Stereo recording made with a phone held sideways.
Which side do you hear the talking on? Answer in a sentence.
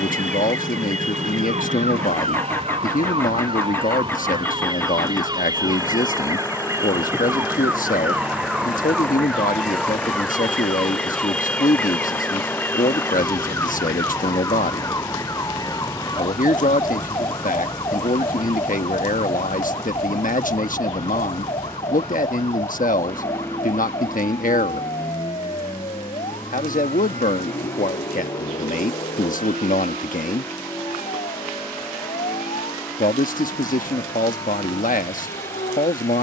You can hear the talking on the left.